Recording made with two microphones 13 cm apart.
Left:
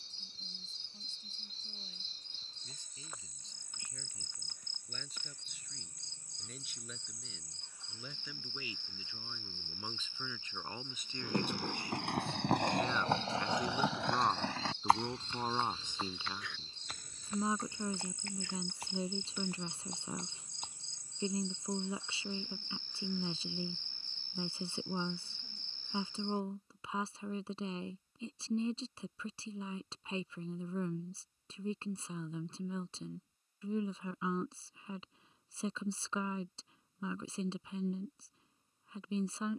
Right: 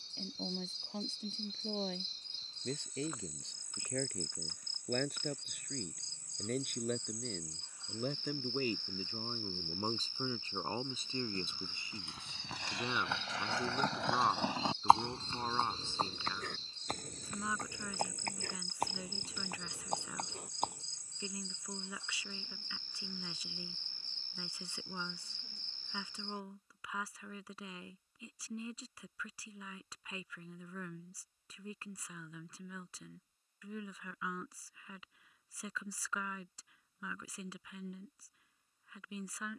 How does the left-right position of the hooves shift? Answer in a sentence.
You can hear the hooves move to the right.